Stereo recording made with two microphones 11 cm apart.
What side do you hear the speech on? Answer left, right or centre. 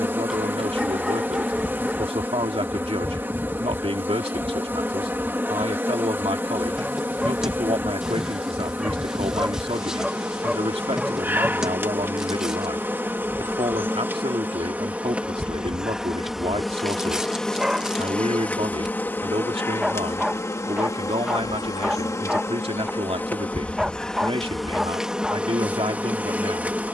right.